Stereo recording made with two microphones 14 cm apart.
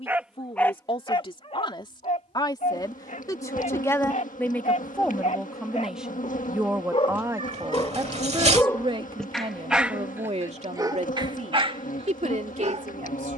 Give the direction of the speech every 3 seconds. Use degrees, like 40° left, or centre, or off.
40° left, 10° left, 20° right, 50° right, 60° right.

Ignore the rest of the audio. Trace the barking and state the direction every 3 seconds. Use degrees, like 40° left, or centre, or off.
30° left, 60° left, 30° left, 20° right, 50° right.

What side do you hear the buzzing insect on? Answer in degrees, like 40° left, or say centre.
70° left.